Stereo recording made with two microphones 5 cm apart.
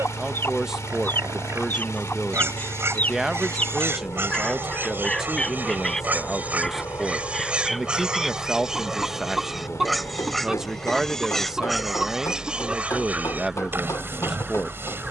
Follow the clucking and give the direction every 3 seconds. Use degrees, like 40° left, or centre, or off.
30° left, 10° left, centre, 10° right, 20° right.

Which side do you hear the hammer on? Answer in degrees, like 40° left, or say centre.
70° left.